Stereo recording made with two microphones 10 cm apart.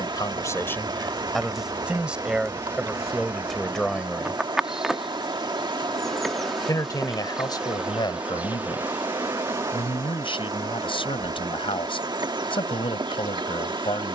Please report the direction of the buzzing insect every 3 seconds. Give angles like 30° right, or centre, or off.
40° right, 10° right, 10° right, 30° right, 50° right.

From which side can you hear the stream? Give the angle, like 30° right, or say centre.
50° right.